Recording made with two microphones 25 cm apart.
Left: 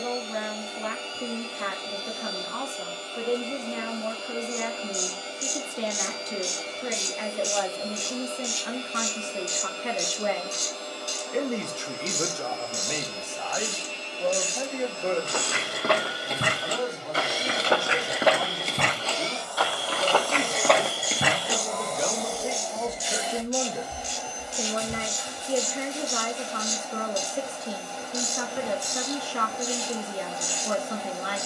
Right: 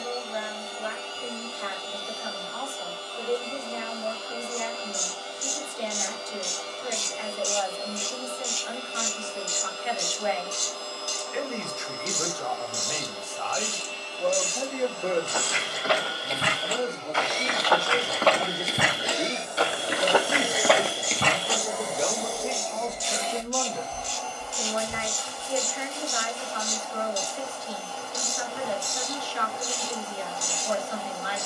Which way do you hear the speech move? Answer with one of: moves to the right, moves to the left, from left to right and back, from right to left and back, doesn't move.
from left to right and back.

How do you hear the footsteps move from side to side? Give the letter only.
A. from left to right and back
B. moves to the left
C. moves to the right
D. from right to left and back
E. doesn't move
A.